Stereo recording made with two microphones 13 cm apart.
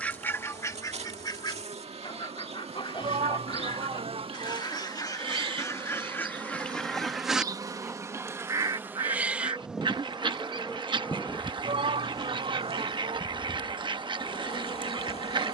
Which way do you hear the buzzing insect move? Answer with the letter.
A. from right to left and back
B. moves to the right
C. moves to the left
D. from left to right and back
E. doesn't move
C.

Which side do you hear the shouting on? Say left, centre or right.
right.